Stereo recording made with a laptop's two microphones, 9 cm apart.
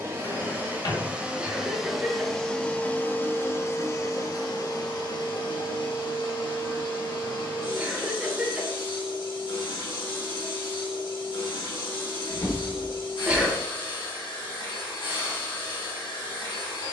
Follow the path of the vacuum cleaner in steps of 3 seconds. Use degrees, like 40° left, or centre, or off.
10° right, 40° left, 60° left, 60° left, 60° left, 60° left.